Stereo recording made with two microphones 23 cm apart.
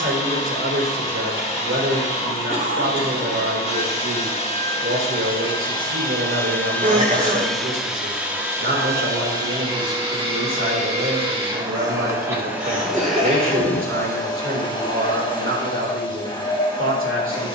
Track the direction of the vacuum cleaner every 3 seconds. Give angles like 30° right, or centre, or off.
30° left, 20° left, centre, 20° right, centre, 20° left.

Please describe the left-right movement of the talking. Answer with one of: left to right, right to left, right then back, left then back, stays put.
stays put.